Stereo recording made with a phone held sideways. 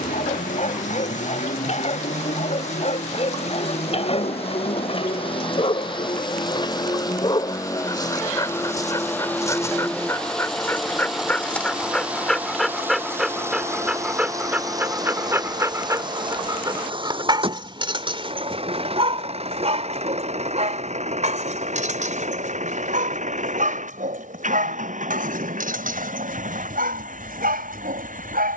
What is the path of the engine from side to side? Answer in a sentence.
You can hear the engine move from left to right.